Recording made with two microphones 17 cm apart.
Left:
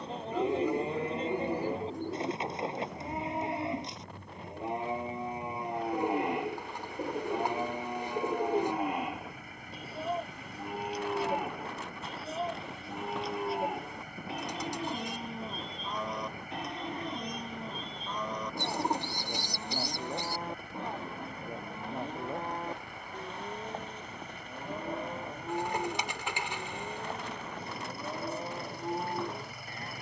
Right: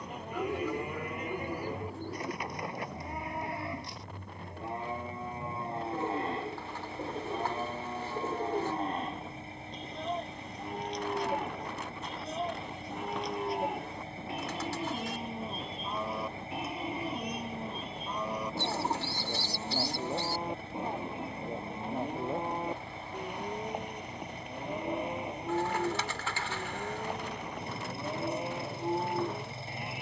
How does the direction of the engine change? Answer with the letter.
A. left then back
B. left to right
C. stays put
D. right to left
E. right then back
C.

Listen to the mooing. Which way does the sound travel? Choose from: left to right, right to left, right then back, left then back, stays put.
left to right.